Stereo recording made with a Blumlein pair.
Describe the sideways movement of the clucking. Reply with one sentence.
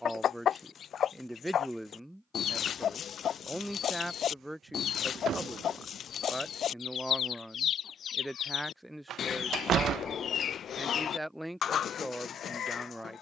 You can hear the clucking stay put.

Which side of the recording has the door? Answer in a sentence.
You can hear the door on the right.